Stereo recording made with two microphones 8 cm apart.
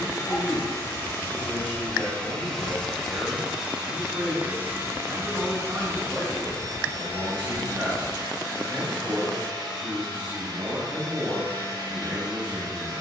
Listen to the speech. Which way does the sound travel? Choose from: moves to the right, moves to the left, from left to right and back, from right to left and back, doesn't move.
doesn't move.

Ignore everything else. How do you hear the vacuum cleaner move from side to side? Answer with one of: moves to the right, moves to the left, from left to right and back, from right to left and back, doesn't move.
moves to the right.